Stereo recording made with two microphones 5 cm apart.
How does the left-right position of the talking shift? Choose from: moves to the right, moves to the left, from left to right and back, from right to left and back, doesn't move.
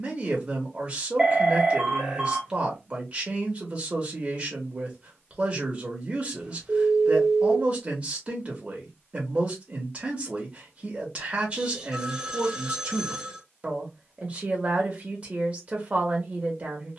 doesn't move.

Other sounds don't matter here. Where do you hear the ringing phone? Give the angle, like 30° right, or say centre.
10° right.